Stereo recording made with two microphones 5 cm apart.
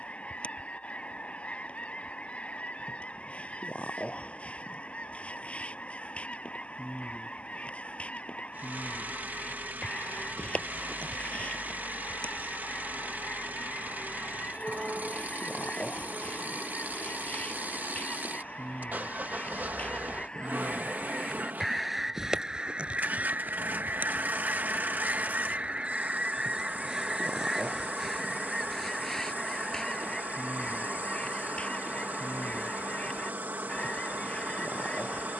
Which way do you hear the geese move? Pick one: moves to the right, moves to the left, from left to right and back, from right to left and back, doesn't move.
from left to right and back.